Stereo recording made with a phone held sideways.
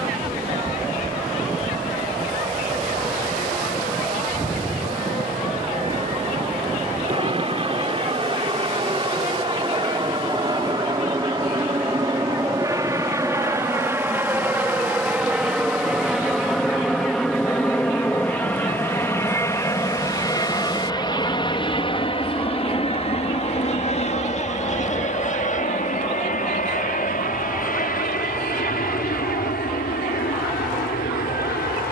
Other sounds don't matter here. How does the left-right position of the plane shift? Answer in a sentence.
In this clip you hear the plane go from the right side to the left.